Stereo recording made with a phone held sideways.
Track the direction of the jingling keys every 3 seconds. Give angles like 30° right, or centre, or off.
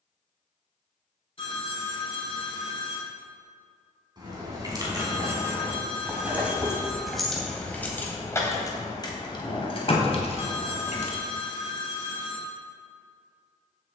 off, 20° right, 10° left, 50° left, off.